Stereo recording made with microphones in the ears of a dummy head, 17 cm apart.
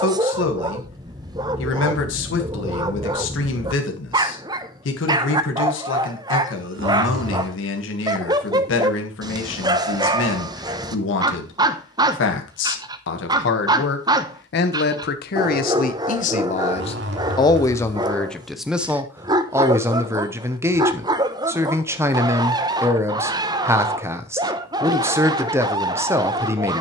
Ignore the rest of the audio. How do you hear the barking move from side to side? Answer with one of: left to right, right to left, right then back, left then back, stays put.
stays put.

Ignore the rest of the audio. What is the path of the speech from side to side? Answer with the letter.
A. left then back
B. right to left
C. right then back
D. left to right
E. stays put
D.